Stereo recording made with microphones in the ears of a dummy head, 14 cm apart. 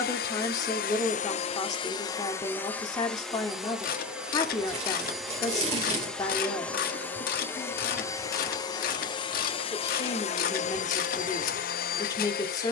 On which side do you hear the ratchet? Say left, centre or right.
left.